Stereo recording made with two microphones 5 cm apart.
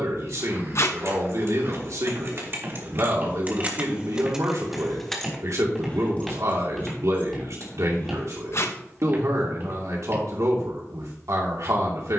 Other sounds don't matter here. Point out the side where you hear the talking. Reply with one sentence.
In this clip you hear the talking on the right.